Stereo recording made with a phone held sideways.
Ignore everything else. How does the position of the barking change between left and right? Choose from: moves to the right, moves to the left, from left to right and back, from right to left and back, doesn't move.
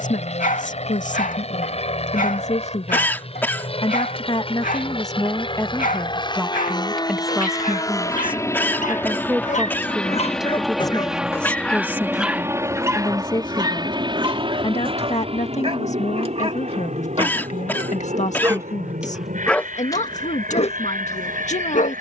from left to right and back.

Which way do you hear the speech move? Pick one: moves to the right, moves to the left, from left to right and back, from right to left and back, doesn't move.
from left to right and back.